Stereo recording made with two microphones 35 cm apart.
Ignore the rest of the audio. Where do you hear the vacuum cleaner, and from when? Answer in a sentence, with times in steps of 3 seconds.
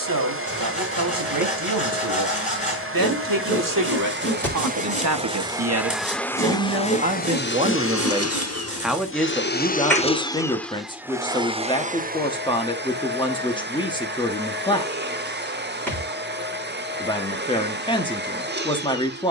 You can hear the vacuum cleaner on the right from 0 s, on the left from 6 s, in the centre from 9 s and on the right from 12 s.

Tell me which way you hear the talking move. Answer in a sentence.
You can hear the talking move to the left.